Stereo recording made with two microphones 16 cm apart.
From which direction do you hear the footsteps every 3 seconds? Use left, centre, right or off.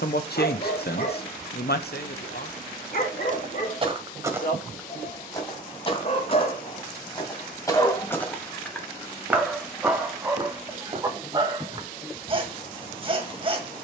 off, centre, left, right, off.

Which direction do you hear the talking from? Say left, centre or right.
left.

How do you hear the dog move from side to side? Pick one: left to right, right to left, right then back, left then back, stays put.
left to right.